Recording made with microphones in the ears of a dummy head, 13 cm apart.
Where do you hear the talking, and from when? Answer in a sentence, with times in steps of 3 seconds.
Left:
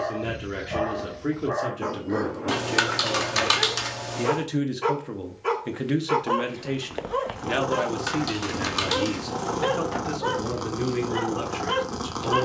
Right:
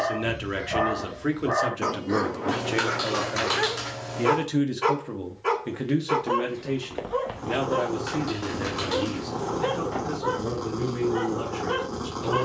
You can hear the talking on the right from 0 s, in the centre from 3 s and on the left from 6 s.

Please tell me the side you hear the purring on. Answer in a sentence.
You can hear the purring on the left.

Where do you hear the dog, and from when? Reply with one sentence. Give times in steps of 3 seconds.
You can hear the dog on the right from 0 s and on the left from 6 s.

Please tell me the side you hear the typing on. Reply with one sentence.
You can hear the typing on the left.